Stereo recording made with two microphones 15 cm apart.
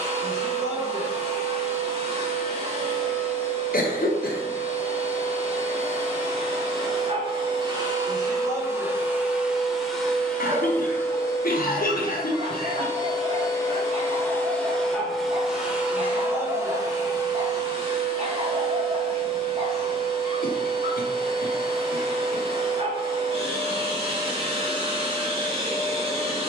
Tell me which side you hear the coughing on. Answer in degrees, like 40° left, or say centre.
80° left.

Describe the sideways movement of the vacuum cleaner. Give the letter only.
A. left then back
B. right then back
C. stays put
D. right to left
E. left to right
A.